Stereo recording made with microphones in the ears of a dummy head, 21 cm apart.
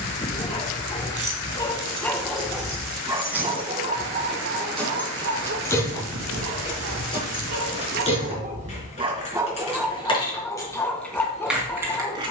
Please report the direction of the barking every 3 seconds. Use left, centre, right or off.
centre, right, right, centre.